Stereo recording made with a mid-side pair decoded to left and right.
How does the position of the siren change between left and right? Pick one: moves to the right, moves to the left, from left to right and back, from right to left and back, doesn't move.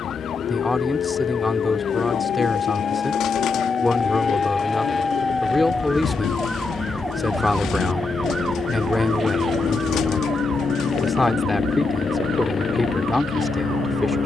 moves to the right.